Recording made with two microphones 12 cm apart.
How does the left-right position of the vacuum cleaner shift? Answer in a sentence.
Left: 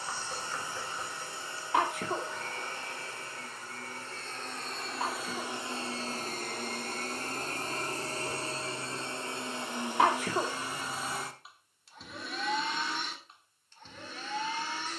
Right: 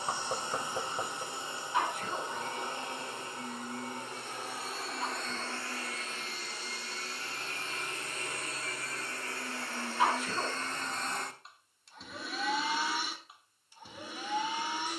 In this clip you hear the vacuum cleaner move from right to left and back again.